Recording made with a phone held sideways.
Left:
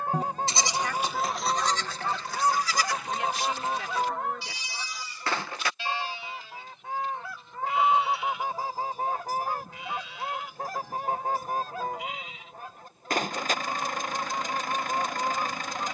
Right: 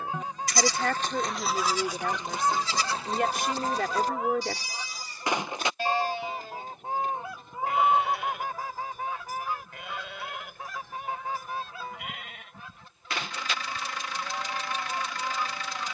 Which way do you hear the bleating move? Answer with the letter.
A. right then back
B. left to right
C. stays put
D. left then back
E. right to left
B.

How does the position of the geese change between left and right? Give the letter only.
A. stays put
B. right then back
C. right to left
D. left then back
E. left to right
B.